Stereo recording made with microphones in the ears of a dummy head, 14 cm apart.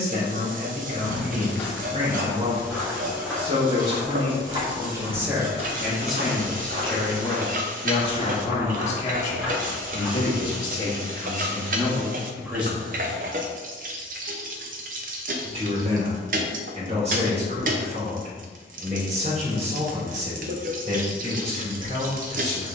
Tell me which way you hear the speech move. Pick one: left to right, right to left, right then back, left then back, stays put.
left then back.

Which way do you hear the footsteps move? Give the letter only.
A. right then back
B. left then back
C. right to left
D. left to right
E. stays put
A.